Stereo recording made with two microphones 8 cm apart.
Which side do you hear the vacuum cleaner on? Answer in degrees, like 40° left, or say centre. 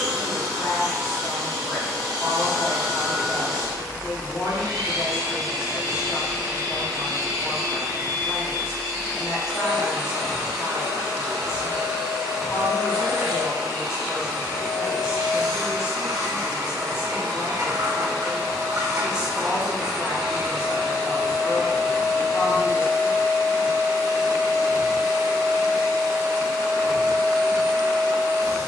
70° right.